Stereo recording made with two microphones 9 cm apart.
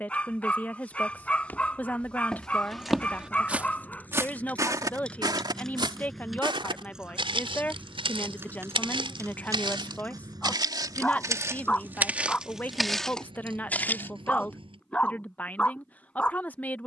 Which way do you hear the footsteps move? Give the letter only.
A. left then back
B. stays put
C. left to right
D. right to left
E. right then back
E.